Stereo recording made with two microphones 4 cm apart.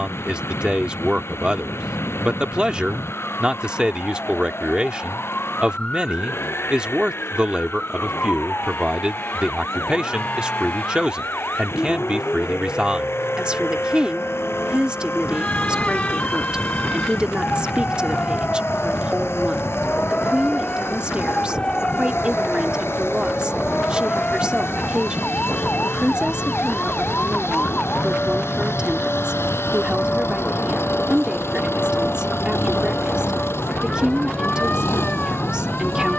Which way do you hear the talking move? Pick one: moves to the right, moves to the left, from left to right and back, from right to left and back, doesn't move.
doesn't move.